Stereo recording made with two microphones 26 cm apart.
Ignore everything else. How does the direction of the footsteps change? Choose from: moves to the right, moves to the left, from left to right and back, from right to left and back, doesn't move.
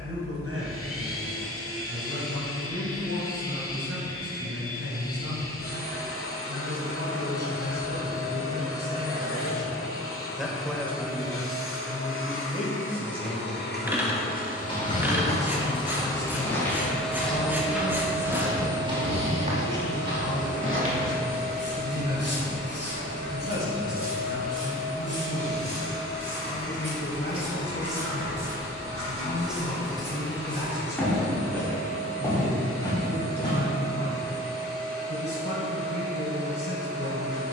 from left to right and back.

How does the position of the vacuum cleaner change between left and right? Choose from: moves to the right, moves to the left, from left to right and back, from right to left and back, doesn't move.
moves to the right.